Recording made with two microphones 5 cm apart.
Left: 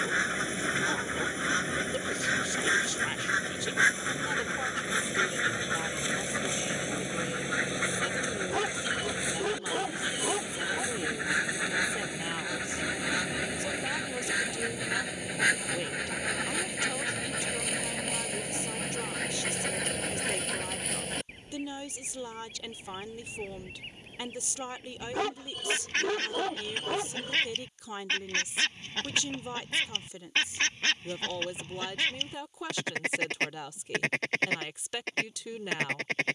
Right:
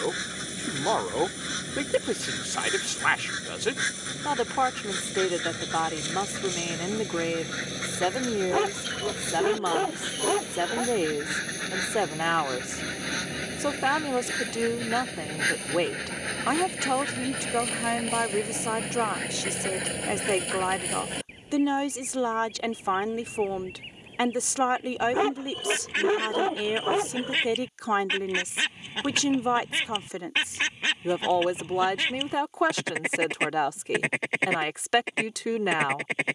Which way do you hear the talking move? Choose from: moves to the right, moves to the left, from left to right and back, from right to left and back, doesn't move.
doesn't move.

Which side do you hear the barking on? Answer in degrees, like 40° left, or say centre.
20° right.